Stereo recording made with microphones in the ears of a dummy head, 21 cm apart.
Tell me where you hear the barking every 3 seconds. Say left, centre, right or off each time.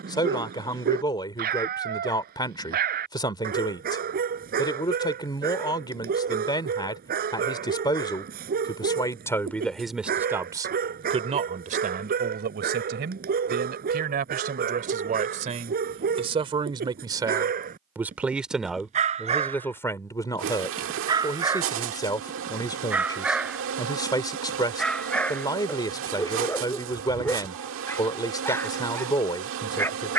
right, right, right, right, right, right, right, centre, centre, centre.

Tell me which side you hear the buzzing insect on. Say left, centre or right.
right.